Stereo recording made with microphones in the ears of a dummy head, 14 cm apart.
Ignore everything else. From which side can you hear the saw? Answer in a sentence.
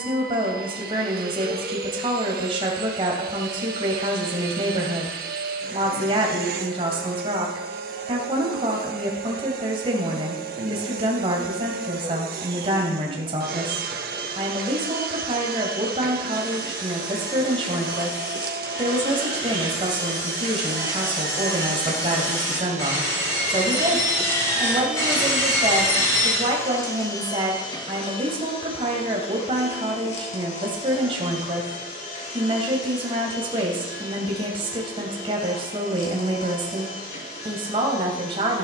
In this clip you hear the saw on the left.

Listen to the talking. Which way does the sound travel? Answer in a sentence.
You can hear the talking stay in one place.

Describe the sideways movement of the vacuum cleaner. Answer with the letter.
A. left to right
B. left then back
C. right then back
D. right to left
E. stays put
D.